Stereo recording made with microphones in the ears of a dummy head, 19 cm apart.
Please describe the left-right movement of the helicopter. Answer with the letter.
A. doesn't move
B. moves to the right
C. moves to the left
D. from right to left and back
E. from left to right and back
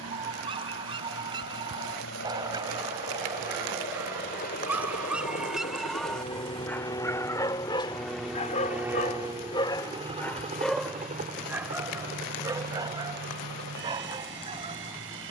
B.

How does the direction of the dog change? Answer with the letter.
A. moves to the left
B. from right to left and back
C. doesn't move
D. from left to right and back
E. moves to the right
B.